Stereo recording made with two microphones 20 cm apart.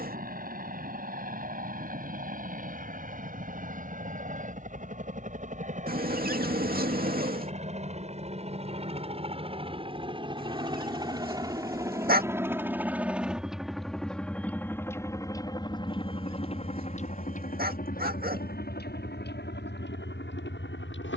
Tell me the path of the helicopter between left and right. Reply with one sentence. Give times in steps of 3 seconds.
In this clip you hear the helicopter on the right from 0 s, in the centre from 12 s and on the left from 15 s.